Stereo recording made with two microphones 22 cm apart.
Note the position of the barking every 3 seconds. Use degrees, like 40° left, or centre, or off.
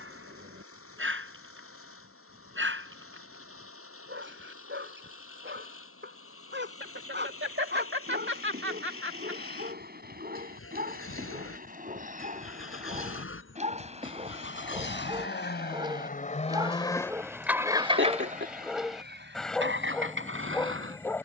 60° right, 60° right, 50° right, 40° right, 30° right, 20° right, centre.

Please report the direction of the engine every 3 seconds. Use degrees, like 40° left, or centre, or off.
80° left, 80° left, 80° left, 80° left, 70° left, 20° left, 60° right.